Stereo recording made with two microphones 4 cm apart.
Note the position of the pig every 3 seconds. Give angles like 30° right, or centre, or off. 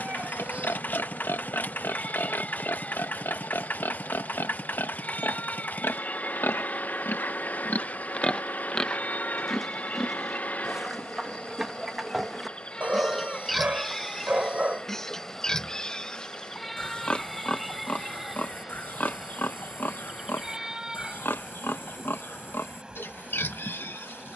80° left, 80° left, 50° left, centre, centre, 20° left, 50° left, 70° left.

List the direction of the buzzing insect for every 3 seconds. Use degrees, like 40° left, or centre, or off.
40° left, 40° left, 40° left, 30° left, 20° left, centre, 10° right, 20° right.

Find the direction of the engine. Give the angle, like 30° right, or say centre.
50° left.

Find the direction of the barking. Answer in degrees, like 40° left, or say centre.
40° right.